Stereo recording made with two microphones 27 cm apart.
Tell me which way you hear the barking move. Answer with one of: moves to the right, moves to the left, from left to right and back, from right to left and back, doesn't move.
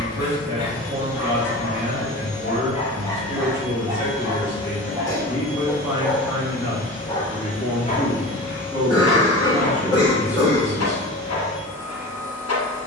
from left to right and back.